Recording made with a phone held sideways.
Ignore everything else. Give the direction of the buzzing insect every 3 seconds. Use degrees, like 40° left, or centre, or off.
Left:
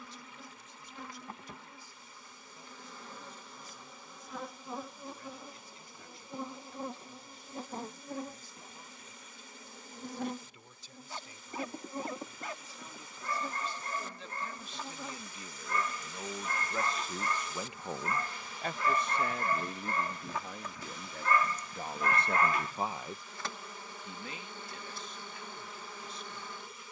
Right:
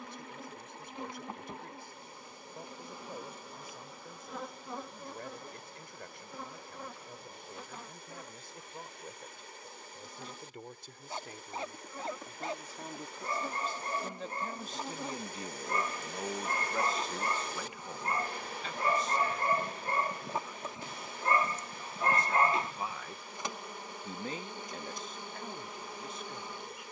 20° right, centre, 30° left, 50° left, centre, 20° right, 20° right, 20° right, 20° right.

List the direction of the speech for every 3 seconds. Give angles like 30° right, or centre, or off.
60° right, 60° right, 60° right, 60° right, 50° right, 10° right, 70° left, 60° left, 50° right.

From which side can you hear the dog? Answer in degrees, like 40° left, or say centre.
30° right.